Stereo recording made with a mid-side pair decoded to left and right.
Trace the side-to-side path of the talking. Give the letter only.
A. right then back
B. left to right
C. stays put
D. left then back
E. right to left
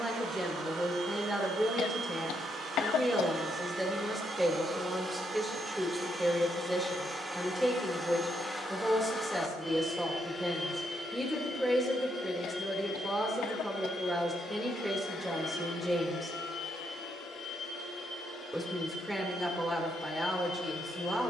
C.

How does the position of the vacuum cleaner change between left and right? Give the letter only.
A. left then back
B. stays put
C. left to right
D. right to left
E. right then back
D.